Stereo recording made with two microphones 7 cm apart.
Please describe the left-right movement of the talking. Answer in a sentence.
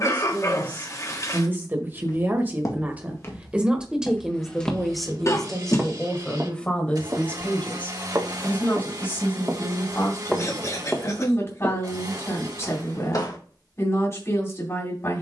In this clip you hear the talking go from the right side to the left.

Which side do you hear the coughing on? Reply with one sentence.
You can hear the coughing on the left.